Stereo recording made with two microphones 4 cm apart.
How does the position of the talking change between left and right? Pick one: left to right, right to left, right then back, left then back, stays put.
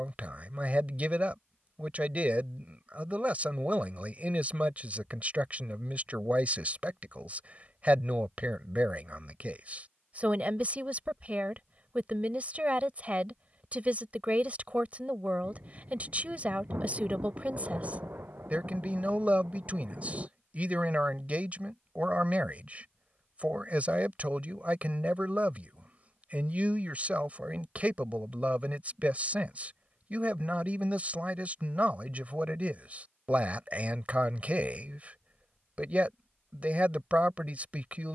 stays put.